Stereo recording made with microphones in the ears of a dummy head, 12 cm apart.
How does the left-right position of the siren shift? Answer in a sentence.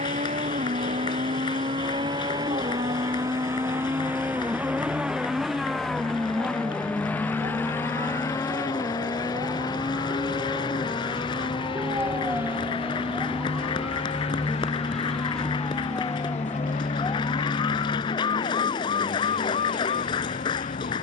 You can hear the siren move to the left.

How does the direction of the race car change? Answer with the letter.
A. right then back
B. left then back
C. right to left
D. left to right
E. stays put
C.